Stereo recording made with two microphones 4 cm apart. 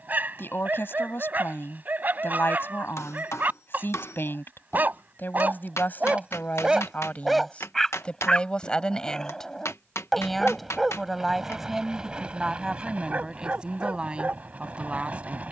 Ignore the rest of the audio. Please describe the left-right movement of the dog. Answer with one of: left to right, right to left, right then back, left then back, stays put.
left then back.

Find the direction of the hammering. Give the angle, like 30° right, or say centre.
80° left.